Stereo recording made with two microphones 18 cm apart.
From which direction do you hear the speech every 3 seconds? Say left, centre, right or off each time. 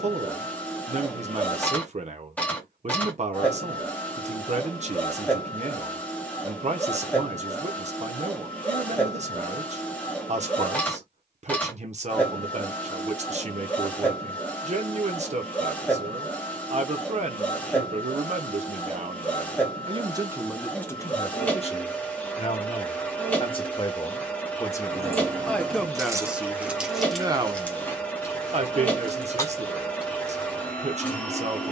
right, right, right, right, right, right, right, left, centre, right, right.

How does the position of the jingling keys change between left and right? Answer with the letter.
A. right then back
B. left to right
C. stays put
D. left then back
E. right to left
D.